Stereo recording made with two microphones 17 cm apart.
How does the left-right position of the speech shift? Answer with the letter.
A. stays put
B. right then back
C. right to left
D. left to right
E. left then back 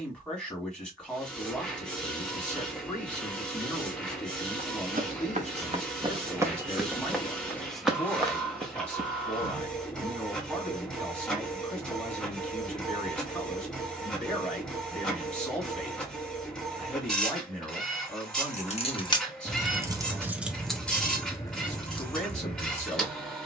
A.